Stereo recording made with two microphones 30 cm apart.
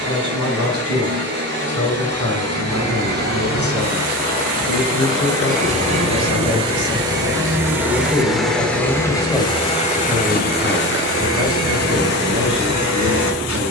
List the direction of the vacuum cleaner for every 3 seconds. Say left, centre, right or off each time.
right, right, centre, left, left.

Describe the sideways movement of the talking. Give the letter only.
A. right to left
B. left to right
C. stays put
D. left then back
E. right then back
B.